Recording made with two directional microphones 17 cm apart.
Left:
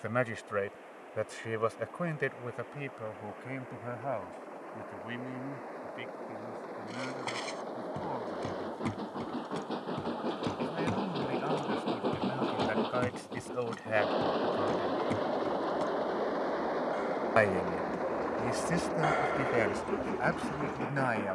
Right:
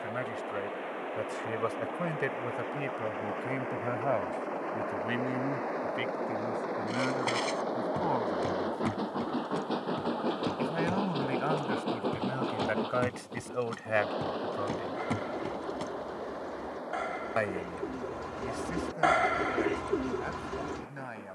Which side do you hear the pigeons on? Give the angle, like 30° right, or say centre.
30° right.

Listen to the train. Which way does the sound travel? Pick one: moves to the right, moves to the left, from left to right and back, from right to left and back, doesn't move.
moves to the left.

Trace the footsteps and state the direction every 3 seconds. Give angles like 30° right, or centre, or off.
off, off, 20° right, 10° left, 10° right, 20° right, off.